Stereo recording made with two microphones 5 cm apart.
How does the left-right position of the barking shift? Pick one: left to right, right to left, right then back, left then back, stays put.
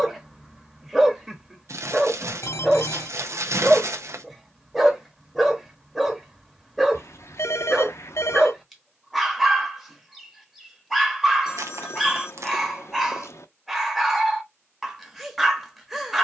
stays put.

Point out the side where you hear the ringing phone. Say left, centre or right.
left.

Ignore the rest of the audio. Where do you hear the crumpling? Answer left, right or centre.
right.